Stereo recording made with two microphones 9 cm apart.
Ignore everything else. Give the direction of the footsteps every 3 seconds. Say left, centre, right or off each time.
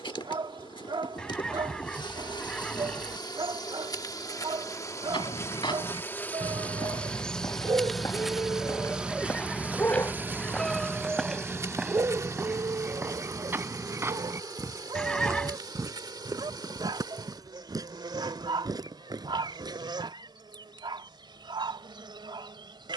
off, left, left, centre, right, right, right, off.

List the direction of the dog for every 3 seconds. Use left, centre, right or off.
right, right, right, centre, right, right, right, right.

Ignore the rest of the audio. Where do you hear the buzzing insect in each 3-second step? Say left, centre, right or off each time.
left, left, centre, right, right, right, right, right.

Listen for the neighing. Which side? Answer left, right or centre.
centre.